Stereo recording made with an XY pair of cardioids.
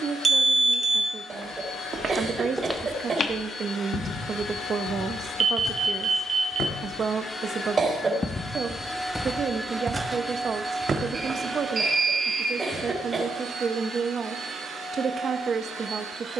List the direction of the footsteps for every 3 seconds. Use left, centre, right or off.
right, left, left, right, off, off.